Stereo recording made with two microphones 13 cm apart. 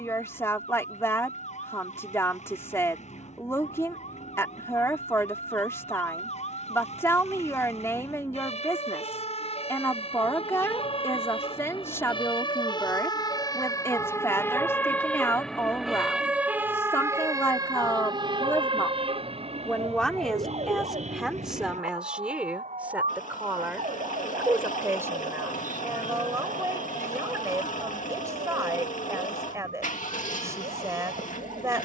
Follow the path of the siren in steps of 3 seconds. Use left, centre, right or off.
left, left, left, left, left, centre, right, right, right, right, right.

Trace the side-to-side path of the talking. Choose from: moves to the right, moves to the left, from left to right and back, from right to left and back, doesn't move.
moves to the right.